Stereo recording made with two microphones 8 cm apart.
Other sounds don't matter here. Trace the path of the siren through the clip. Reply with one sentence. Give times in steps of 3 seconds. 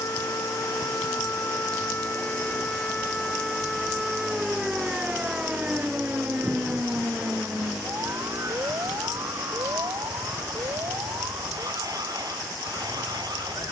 You can hear the siren on the left from 0 s, in the centre from 3 s and on the right from 6 s.